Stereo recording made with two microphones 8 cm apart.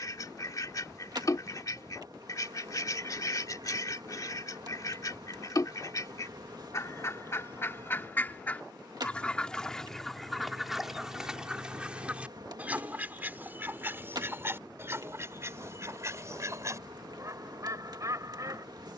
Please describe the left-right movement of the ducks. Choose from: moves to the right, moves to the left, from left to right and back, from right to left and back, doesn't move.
moves to the right.